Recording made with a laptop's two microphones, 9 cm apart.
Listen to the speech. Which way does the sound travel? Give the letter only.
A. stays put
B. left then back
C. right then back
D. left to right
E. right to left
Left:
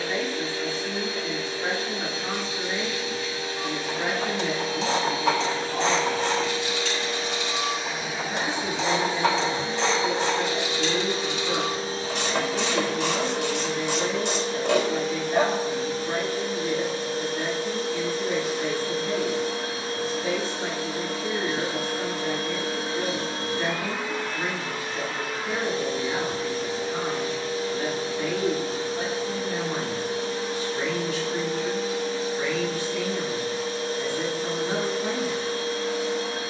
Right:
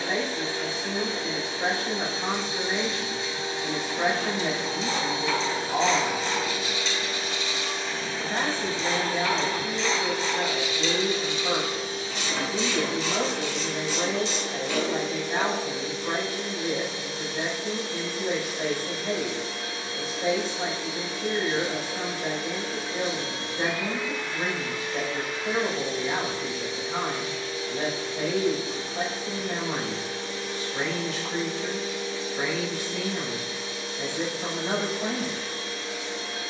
A.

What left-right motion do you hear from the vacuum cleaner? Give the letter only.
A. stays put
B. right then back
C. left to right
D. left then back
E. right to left
E.